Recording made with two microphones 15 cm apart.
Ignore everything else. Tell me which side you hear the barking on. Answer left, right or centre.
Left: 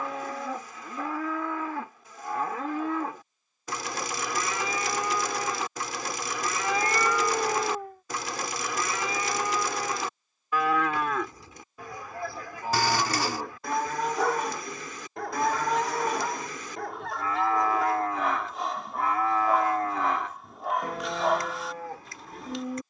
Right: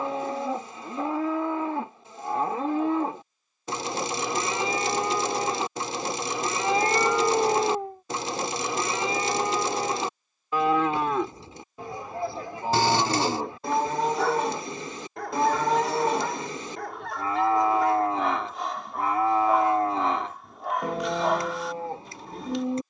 centre.